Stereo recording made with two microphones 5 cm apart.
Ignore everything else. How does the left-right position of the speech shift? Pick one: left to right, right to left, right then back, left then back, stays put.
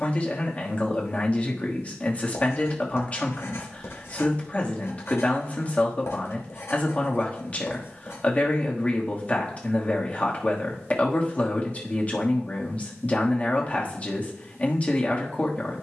stays put.